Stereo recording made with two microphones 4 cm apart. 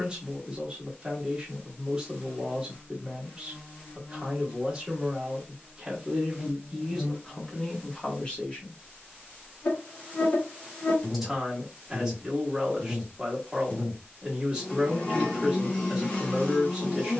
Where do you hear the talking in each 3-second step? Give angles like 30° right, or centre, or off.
20° right, 20° right, 10° left, 10° right, 10° right, 10° right.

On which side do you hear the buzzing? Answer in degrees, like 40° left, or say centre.
30° left.